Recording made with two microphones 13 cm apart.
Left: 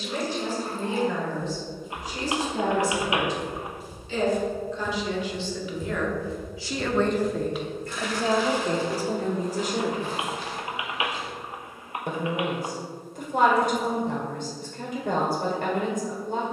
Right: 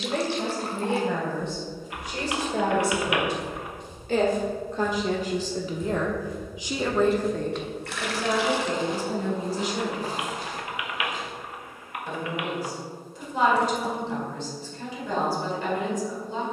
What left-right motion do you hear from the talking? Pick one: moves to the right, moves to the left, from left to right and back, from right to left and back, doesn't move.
moves to the left.